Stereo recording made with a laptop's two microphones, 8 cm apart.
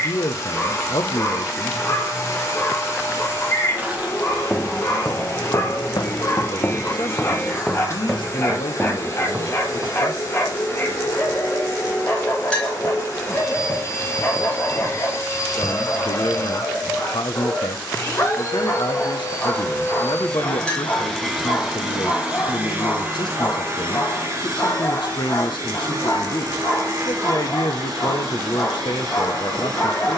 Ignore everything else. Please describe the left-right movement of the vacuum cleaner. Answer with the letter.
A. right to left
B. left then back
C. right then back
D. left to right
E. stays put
D.